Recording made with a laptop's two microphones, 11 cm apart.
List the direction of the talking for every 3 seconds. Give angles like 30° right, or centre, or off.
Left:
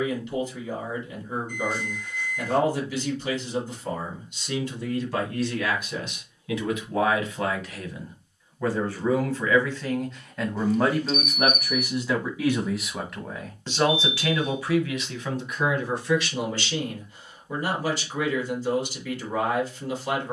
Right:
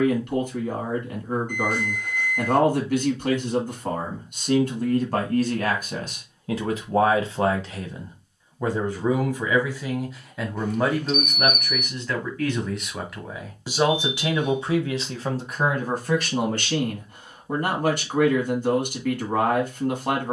60° right, 50° right, 30° right, centre, 10° right, 50° right, 50° right.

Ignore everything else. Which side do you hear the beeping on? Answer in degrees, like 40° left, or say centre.
60° right.